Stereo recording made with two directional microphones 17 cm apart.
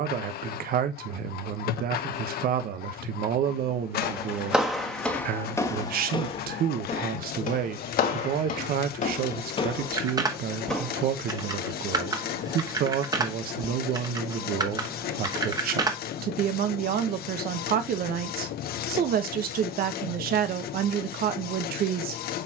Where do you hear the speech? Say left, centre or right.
right.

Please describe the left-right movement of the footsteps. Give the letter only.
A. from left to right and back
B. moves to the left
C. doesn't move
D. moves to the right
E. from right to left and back
E.